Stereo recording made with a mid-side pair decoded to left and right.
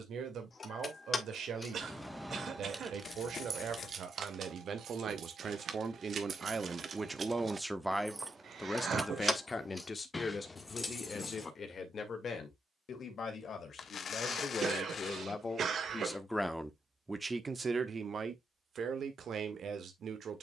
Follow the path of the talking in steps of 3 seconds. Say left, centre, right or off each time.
right, right, centre, left, left, centre, right.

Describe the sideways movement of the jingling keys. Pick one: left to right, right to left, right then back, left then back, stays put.
right then back.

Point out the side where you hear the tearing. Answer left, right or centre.
left.